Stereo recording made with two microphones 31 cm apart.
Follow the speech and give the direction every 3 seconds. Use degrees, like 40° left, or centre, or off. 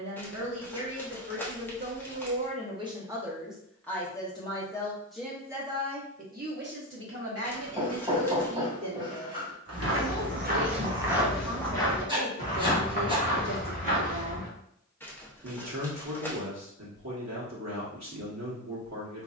40° right, centre, 50° right, 60° right, 60° right, 60° right, 60° right.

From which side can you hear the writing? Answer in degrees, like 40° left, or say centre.
20° right.